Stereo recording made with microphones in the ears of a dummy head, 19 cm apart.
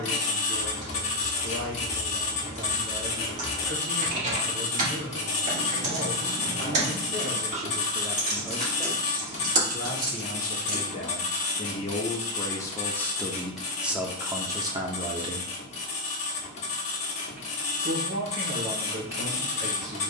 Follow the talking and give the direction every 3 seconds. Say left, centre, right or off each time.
right, right, right, left, centre, right, right.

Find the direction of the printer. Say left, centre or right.
left.